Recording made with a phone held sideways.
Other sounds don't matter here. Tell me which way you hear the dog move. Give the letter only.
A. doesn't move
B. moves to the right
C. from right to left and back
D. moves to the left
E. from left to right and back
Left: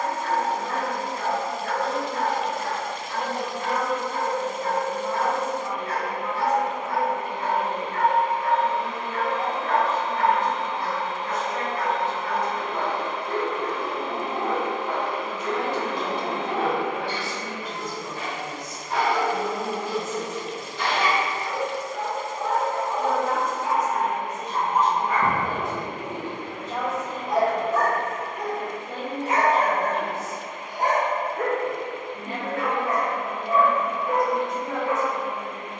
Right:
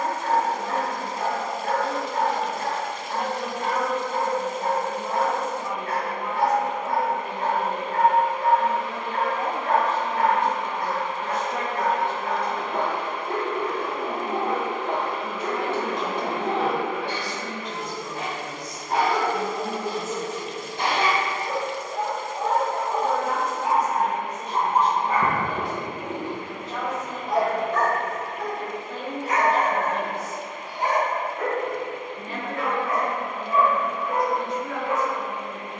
D.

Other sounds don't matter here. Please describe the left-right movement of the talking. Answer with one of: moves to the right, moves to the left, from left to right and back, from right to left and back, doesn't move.
moves to the left.